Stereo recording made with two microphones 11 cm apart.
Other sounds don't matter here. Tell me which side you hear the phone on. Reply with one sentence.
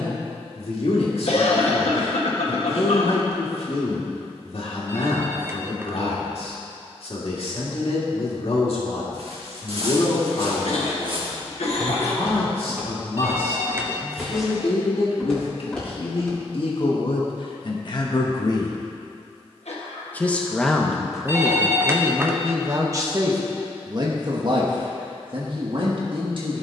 In this clip you hear the phone on the right.